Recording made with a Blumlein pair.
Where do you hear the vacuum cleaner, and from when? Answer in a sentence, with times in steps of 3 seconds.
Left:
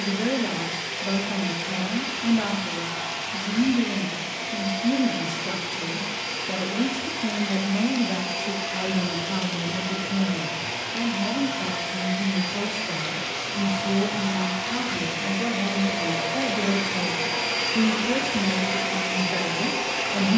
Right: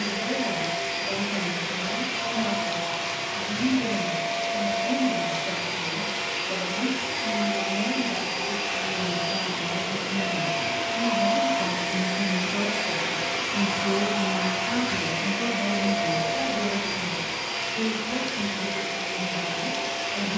You can hear the vacuum cleaner on the right from 0 s, in the centre from 15 s and on the left from 18 s.